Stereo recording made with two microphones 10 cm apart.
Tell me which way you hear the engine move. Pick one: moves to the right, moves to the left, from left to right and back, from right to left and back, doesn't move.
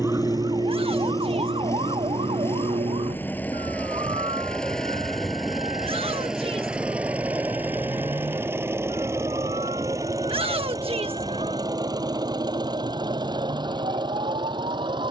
moves to the right.